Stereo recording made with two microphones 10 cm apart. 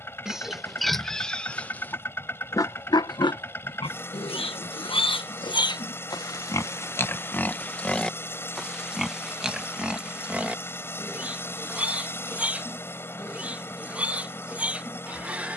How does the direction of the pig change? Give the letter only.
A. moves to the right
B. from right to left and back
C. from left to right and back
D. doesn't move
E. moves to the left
B.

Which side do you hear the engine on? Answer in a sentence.
You can hear the engine on the left.